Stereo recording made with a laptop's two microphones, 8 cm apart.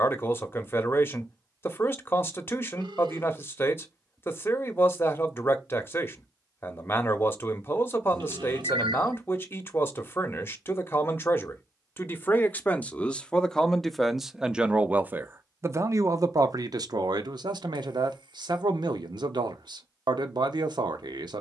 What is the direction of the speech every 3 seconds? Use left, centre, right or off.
left, left, left, left, centre, right, right.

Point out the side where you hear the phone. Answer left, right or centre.
right.